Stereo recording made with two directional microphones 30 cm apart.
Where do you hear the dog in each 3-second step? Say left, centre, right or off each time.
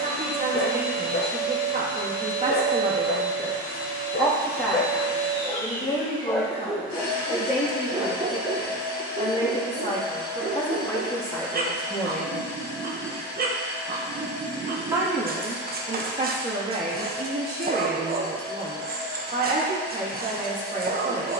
left, left, centre, right, right, right, right.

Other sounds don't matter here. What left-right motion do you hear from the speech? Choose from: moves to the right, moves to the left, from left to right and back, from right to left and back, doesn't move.
from right to left and back.